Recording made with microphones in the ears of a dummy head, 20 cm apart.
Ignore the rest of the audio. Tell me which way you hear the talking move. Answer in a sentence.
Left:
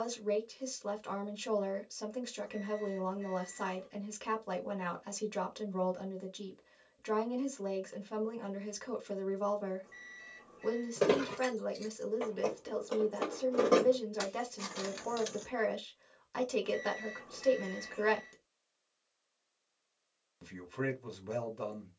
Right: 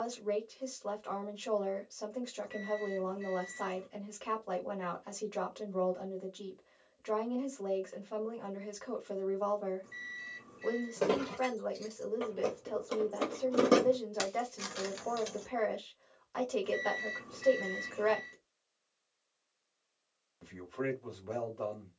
In this clip you hear the talking stay put.